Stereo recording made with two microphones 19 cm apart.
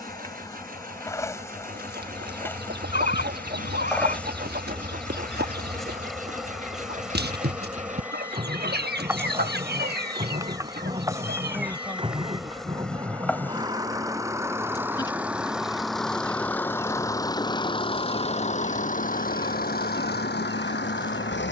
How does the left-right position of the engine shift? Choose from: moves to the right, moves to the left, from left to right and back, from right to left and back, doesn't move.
moves to the left.